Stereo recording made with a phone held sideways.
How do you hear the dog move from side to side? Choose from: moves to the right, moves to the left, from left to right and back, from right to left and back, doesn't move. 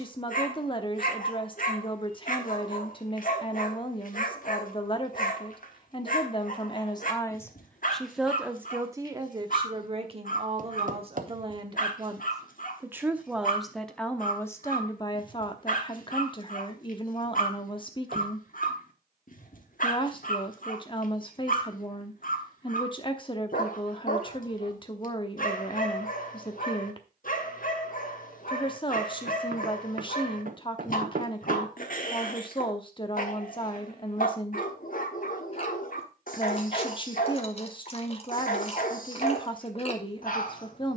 doesn't move.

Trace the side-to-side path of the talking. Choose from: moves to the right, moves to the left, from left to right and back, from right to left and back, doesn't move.
from left to right and back.